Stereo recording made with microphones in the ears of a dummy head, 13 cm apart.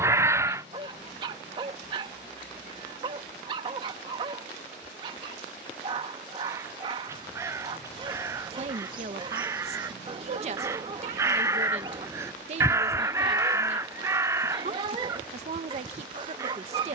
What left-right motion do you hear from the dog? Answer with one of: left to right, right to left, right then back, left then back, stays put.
stays put.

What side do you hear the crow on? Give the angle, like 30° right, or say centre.
20° right.